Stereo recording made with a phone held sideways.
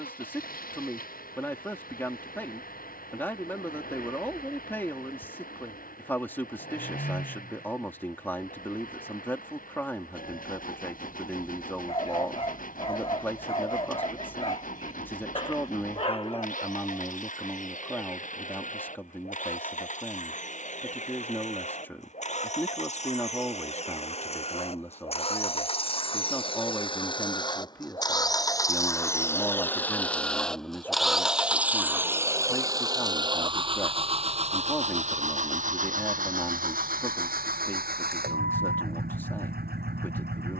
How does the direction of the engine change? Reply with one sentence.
You can hear the engine travel towards the right.